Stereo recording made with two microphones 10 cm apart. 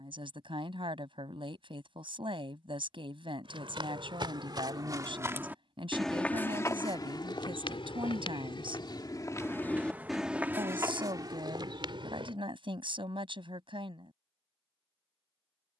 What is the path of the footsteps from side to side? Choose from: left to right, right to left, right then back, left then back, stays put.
left then back.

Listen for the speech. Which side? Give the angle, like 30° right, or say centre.
60° right.